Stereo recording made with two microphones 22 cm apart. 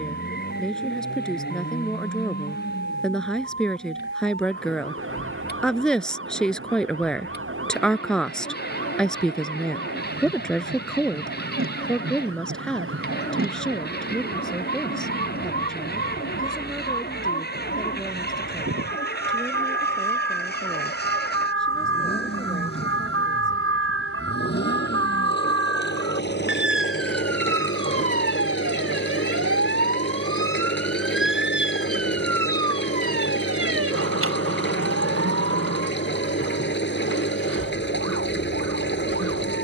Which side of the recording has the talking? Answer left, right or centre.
centre.